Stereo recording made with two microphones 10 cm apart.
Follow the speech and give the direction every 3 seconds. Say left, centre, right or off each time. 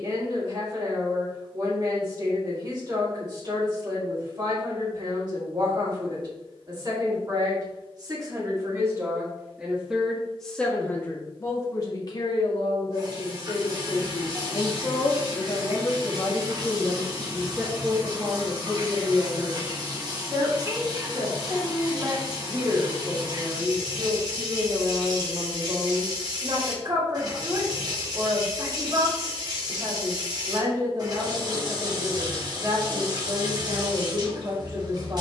right, right, right, centre, left, centre, right, right, right, right, right, right.